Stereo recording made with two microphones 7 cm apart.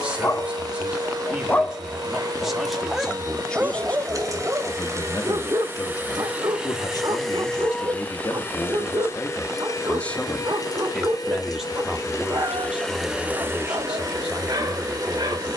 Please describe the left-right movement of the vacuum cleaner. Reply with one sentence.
In this clip you hear the vacuum cleaner go left and come back.